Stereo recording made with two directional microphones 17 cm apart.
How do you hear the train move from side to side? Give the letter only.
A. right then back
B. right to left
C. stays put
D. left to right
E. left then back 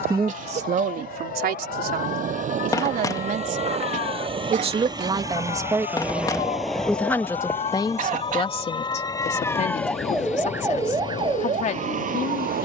B.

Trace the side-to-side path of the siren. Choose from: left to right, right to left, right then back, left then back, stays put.
left to right.